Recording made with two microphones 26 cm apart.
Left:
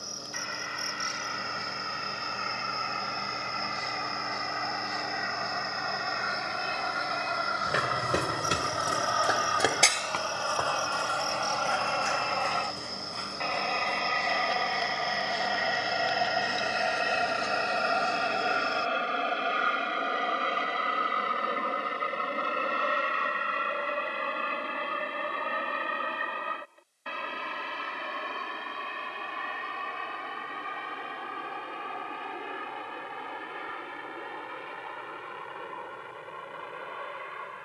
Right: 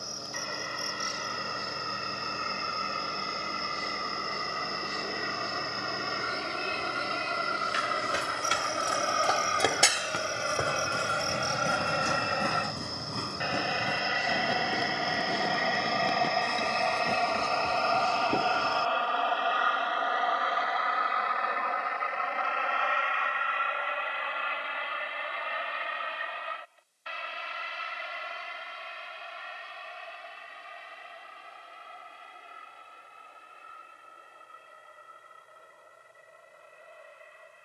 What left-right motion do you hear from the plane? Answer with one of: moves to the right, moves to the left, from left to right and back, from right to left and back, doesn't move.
moves to the left.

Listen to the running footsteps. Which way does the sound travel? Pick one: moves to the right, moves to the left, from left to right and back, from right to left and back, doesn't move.
moves to the right.